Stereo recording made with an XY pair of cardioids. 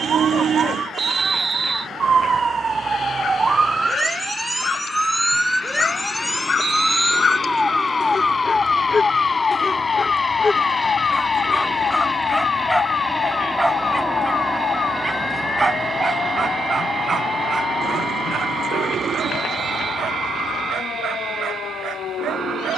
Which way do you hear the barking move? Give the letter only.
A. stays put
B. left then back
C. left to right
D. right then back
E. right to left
C.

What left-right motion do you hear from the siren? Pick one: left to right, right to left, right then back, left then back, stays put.
right to left.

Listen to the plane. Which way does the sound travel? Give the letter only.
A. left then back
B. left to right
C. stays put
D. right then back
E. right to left
B.